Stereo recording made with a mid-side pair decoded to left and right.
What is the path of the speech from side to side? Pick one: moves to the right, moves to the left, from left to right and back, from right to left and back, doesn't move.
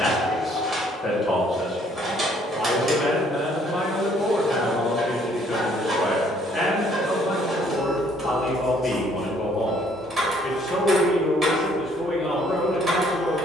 doesn't move.